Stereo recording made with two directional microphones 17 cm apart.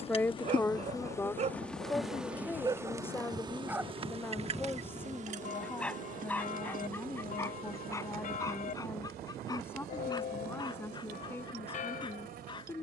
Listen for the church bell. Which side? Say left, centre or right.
left.